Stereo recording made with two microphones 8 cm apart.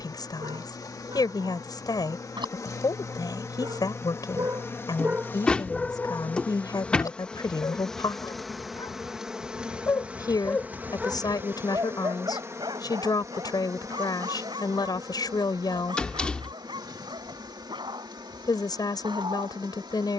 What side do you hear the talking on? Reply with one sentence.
You can hear the talking on the left.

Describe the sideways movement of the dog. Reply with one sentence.
You can hear the dog go left and come back.